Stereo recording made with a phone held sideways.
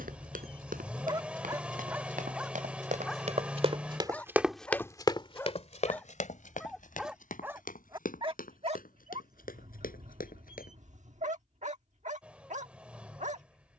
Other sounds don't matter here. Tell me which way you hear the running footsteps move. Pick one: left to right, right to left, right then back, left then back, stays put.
right to left.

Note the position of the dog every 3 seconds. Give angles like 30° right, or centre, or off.
20° right, 10° left, 10° right, 60° right, 60° right.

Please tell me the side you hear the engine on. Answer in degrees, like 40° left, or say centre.
10° right.